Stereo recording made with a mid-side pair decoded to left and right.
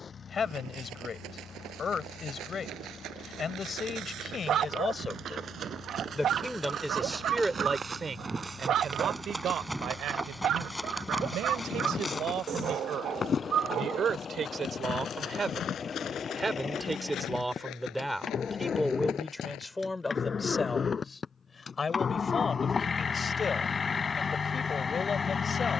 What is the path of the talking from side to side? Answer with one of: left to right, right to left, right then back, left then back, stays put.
right then back.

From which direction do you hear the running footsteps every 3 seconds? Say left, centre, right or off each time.
right, right, right, centre, left, left, left, off, off.